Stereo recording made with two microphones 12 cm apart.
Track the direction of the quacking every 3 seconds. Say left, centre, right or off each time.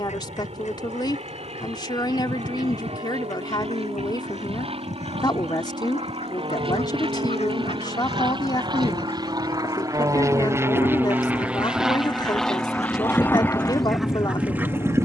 left, left, left, left, centre.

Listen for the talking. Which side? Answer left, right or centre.
left.